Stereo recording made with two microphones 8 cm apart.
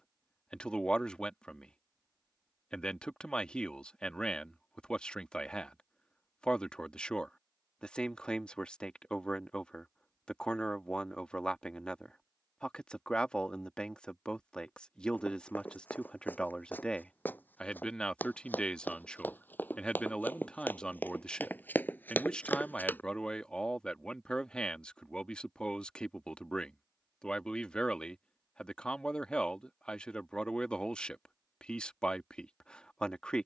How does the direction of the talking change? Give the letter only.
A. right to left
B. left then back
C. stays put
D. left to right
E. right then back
C.